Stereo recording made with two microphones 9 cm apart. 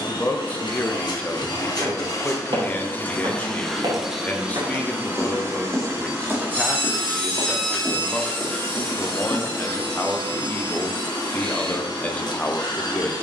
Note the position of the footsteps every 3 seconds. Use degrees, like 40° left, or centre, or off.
70° right, 50° right, centre, 20° left, off.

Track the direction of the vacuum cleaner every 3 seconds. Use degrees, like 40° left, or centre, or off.
50° left, 10° right, centre, 50° left, 50° left.